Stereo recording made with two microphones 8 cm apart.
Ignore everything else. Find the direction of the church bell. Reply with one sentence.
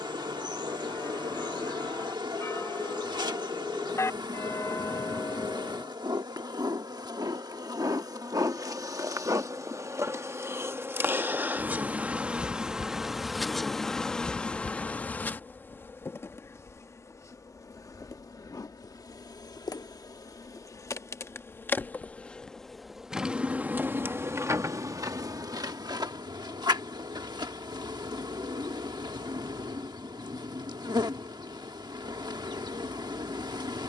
You can hear the church bell on the left.